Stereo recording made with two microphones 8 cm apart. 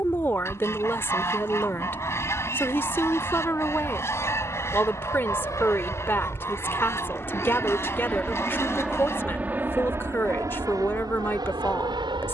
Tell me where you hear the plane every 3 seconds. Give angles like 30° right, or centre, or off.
60° left, 50° left, 20° left, 40° right.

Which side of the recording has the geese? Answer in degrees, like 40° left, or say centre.
40° left.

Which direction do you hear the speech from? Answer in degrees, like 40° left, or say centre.
30° left.